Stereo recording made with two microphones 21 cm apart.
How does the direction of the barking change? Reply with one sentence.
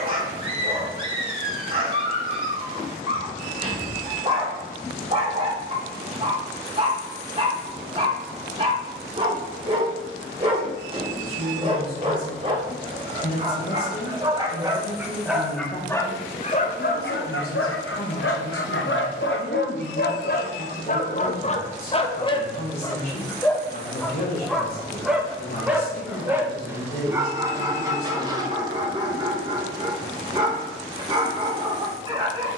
You can hear the barking move from right to left and back again.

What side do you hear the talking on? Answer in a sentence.
You can hear the talking on the left.